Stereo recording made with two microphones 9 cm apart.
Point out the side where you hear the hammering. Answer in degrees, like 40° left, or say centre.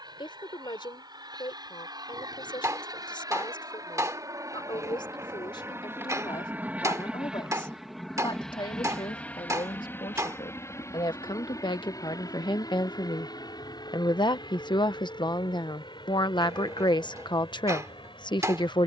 40° right.